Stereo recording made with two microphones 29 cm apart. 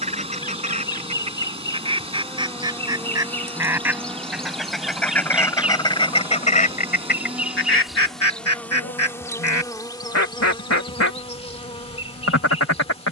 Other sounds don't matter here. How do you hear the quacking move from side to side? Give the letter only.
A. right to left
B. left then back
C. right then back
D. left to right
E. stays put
A.